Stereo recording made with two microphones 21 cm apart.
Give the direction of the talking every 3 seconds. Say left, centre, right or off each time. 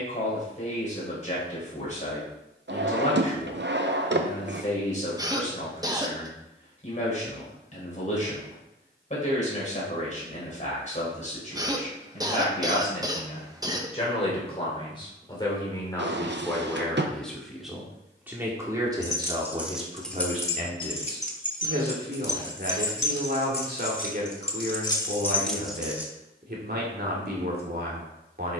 left, left, left, left, left, centre, right, right, right, right.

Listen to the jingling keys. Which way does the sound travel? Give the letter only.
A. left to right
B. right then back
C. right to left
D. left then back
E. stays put
D.